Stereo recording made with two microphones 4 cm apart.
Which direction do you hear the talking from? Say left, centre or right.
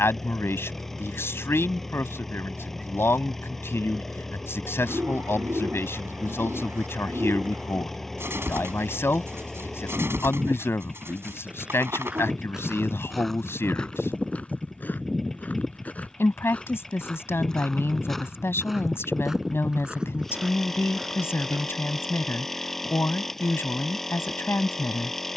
left.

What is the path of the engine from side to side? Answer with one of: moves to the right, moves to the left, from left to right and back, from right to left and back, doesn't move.
doesn't move.